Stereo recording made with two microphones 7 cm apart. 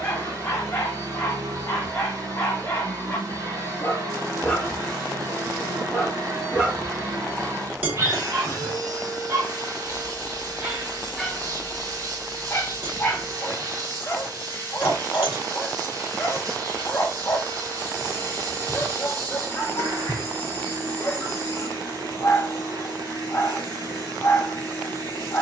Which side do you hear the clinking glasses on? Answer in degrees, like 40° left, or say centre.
20° right.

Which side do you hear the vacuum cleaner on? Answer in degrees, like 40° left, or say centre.
50° right.